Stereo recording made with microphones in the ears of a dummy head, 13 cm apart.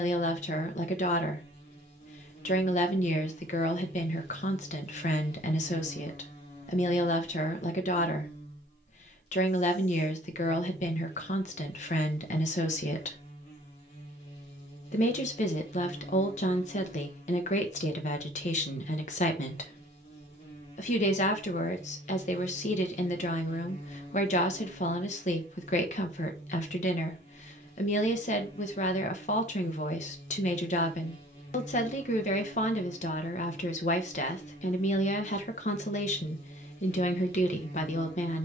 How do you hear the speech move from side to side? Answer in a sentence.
You can hear the speech stay put.